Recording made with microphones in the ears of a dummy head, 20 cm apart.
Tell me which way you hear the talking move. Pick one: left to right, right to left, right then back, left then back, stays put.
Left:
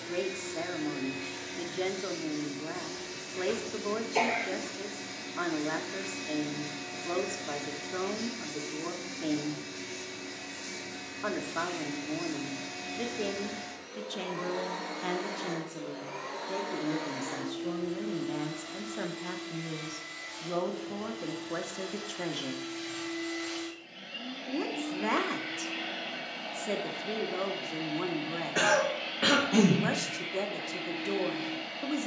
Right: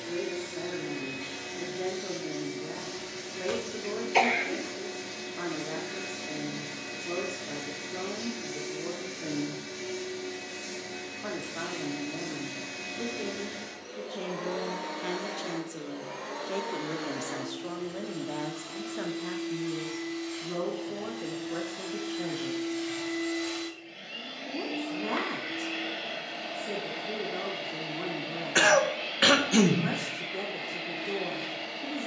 right then back.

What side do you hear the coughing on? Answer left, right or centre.
right.